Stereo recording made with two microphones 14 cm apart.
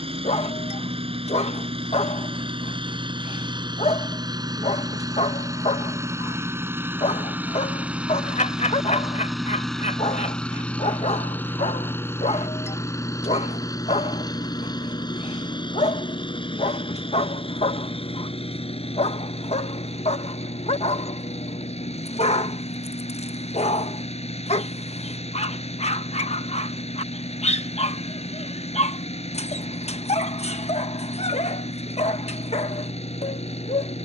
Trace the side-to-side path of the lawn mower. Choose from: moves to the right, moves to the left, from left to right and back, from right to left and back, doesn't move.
moves to the left.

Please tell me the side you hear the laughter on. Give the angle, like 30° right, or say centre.
60° left.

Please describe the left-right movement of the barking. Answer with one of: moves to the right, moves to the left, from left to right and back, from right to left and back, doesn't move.
doesn't move.